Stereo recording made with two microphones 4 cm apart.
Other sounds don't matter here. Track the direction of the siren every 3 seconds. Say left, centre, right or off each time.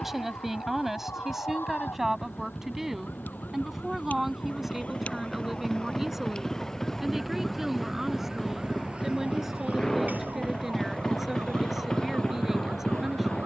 left, left, centre, right, right.